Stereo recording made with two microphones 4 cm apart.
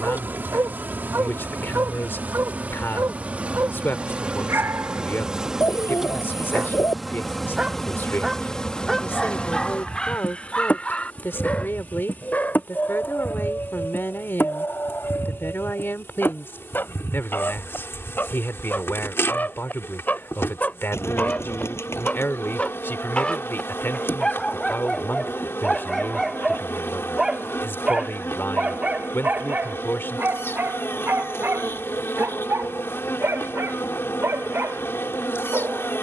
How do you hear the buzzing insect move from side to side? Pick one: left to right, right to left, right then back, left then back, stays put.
right to left.